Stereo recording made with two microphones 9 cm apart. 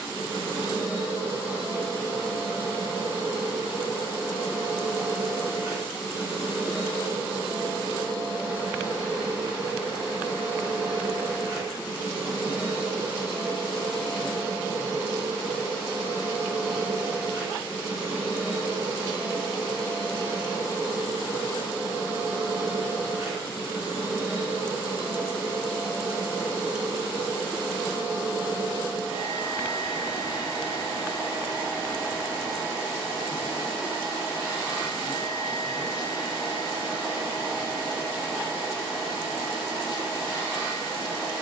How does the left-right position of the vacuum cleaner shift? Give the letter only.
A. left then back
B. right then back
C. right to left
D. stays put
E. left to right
D.